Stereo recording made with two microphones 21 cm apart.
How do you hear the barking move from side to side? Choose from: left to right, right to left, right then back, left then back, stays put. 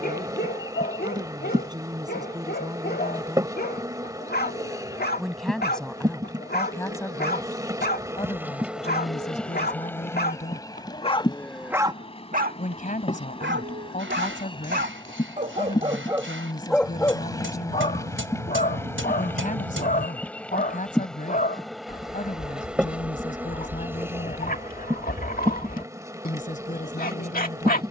right then back.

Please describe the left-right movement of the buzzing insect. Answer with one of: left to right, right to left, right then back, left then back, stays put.
left then back.